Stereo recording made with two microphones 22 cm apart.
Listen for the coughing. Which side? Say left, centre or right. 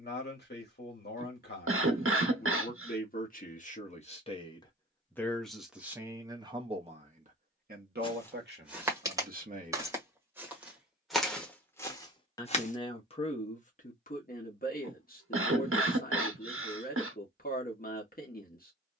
right.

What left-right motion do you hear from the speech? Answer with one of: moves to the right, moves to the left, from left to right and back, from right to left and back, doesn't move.
from left to right and back.